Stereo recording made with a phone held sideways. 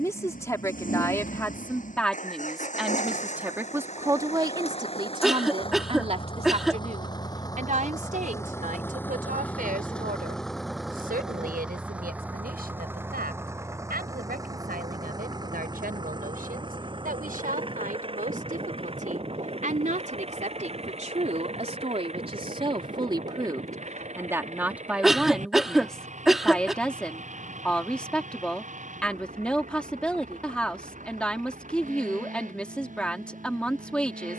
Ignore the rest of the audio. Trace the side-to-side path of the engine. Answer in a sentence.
In this clip you hear the engine go from the left side to the right.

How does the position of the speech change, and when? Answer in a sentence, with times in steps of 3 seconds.
You can hear the speech in the centre from 0 s, on the right from 3 s and in the centre from 24 s.